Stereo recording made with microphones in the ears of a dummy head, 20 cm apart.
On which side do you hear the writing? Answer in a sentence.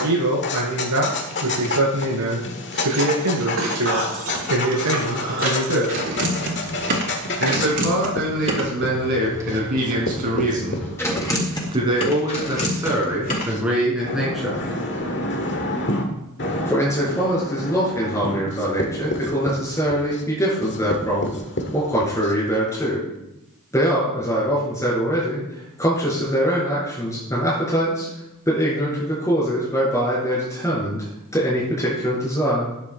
In this clip you hear the writing on the left.